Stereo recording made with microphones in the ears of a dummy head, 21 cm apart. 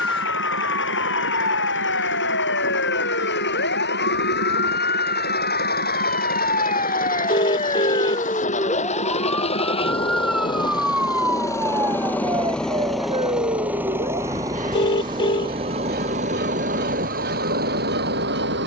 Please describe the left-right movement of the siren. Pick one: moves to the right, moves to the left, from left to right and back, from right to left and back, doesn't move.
moves to the right.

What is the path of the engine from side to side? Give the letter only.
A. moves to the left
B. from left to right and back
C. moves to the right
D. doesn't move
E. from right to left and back
C.